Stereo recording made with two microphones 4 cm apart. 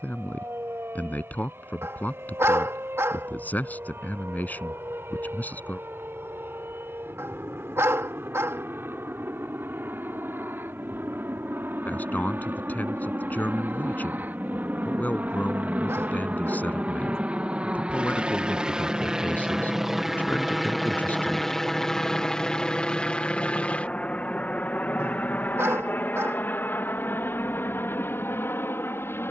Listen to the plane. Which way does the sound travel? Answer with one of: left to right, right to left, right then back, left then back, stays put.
right to left.